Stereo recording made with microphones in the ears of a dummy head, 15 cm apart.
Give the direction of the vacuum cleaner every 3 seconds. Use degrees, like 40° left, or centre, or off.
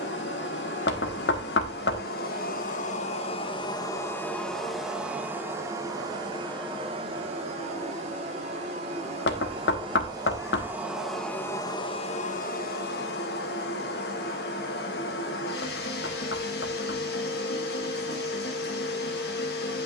60° left, 10° left, 30° right, 10° right, 60° left, 60° left, 60° left.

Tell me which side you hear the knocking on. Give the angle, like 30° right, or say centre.
70° left.